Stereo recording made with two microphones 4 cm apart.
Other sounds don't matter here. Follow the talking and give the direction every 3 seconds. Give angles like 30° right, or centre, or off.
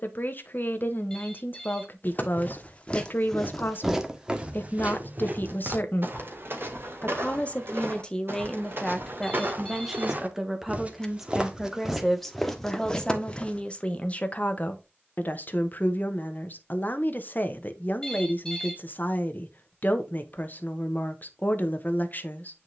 50° left, 50° left, 20° left, 10° right, 20° left, 40° left, 40° left, 40° left.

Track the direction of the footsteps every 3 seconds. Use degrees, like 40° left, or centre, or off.
30° left, 20° right, 60° right, 40° right, 10° left, off, off, off.